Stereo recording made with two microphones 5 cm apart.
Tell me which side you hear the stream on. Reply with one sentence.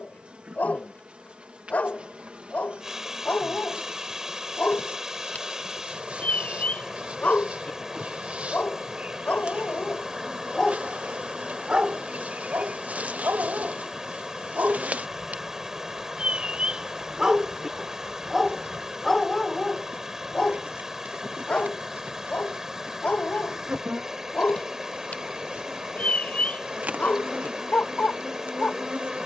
In this clip you hear the stream in the centre.